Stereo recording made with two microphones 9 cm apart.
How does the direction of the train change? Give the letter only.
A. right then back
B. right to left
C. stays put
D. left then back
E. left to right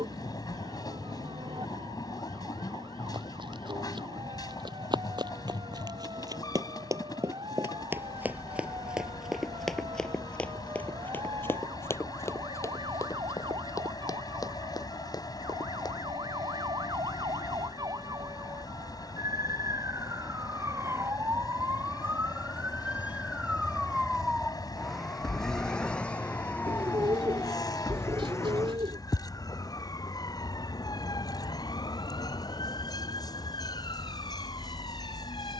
C.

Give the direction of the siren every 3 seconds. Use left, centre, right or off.
right, right, right, right, right, right, right, right, centre, left, left, left.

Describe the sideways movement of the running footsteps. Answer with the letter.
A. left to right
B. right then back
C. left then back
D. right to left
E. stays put
D.